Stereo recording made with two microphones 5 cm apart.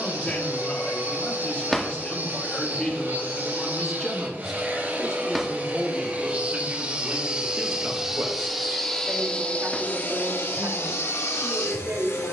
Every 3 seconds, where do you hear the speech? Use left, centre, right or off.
left, centre, right, right.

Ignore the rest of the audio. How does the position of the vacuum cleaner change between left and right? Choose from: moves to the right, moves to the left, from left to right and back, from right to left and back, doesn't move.
moves to the left.